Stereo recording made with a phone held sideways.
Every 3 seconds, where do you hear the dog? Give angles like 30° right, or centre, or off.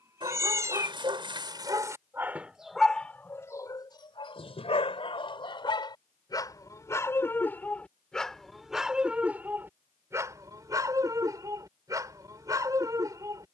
20° right, 30° left, 10° left, 20° right, 20° right.